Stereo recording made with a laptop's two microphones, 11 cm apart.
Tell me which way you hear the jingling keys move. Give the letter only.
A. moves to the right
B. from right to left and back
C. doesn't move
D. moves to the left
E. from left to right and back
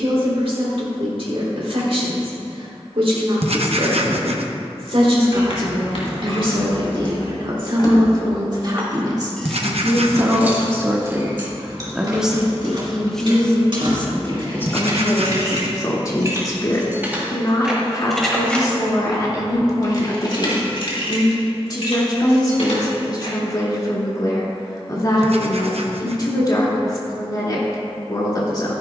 E.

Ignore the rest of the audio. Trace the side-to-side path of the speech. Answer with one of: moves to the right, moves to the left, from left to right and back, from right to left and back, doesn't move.
moves to the left.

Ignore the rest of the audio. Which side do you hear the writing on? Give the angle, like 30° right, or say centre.
70° right.